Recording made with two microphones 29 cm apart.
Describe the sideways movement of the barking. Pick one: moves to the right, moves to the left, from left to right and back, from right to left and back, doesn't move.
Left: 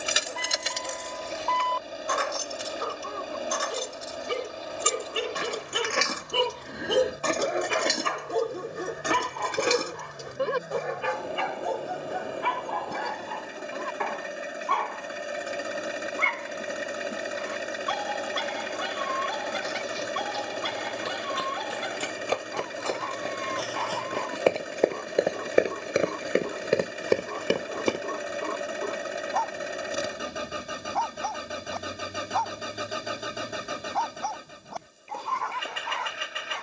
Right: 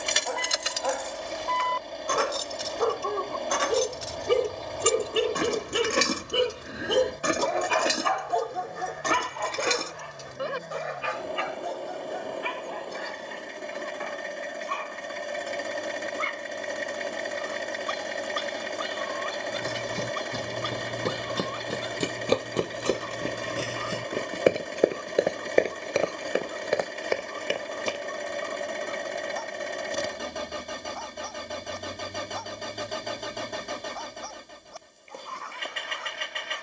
moves to the left.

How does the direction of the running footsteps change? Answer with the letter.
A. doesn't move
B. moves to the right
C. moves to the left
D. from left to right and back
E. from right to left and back
C.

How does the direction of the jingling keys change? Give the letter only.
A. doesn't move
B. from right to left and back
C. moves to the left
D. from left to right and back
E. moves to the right
D.